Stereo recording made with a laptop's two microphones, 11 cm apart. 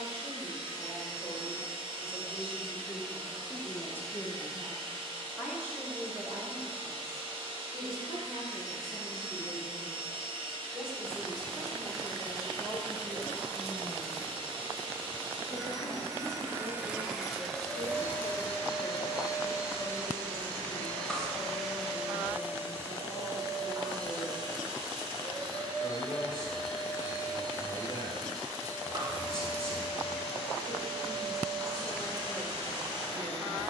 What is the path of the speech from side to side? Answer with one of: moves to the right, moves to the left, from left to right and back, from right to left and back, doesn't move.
from left to right and back.